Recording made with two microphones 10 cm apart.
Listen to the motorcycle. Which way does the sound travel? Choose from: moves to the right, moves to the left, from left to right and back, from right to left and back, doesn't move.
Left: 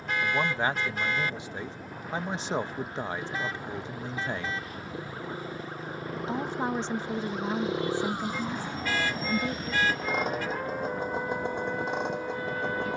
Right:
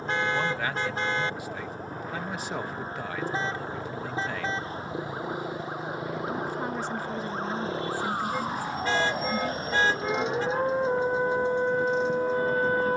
moves to the left.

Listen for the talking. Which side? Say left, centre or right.
left.